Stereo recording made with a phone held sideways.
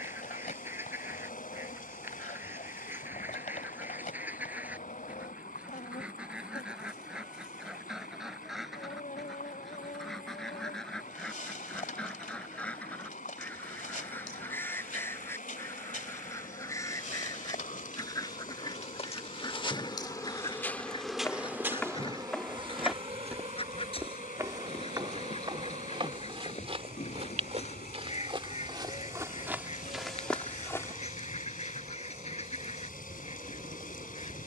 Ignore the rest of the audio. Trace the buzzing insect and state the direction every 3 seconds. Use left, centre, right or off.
left, left, left, left, left, left, left, right, right, right, right, right.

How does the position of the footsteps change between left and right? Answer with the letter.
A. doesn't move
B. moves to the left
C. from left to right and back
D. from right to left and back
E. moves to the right
C.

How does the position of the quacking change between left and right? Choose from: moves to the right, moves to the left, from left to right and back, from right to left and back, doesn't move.
moves to the left.